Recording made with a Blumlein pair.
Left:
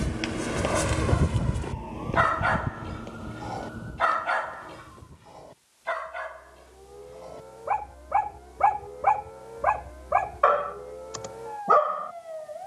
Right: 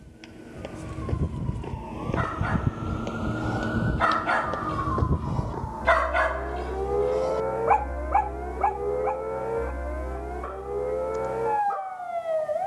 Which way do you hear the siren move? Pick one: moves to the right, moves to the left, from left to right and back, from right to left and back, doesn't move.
moves to the right.